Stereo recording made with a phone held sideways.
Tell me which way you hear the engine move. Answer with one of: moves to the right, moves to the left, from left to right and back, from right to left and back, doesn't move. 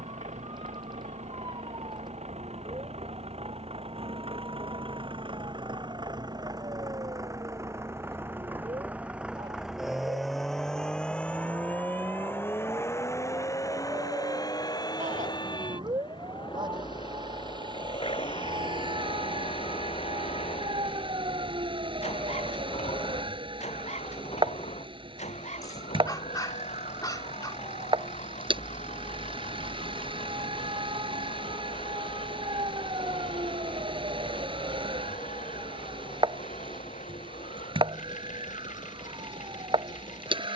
moves to the left.